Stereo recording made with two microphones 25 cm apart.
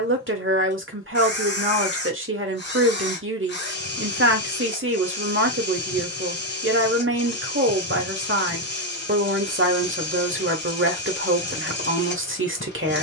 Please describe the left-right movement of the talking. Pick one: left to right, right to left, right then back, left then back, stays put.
stays put.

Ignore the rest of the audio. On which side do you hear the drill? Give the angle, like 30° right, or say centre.
40° left.